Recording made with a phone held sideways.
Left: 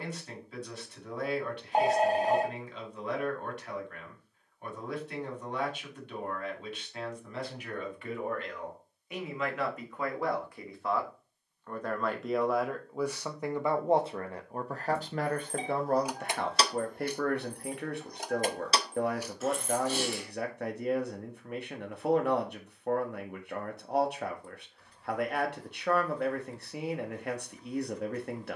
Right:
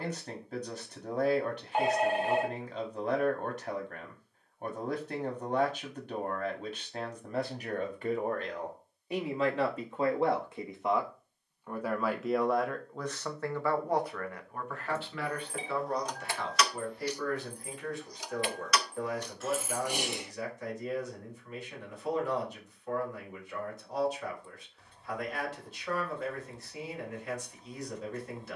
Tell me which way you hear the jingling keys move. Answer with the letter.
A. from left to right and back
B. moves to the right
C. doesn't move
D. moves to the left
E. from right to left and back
E.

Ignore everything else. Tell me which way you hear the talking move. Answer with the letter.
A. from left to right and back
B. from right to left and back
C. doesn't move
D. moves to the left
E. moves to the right
D.